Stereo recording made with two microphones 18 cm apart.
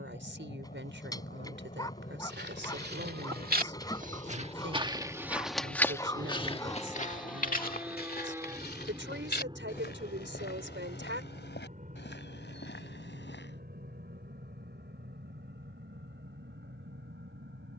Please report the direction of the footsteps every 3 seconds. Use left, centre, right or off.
right, right, left, left, left, off.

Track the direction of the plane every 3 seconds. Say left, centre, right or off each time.
left, left, centre, right, right, right.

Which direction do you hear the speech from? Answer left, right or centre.
right.